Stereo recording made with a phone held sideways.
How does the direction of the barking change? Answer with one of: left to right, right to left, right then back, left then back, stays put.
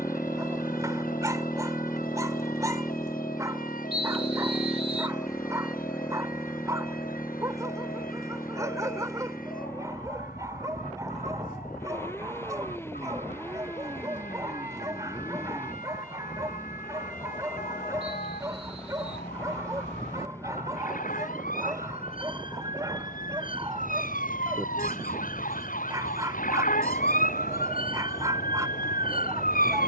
stays put.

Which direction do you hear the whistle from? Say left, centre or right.
right.